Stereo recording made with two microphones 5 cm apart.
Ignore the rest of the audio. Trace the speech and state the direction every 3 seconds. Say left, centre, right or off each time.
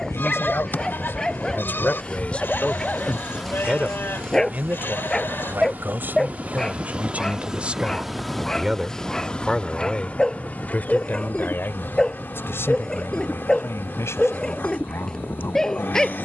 left, right, right, left, left, left.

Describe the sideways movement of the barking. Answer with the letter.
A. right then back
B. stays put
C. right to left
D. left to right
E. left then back
B.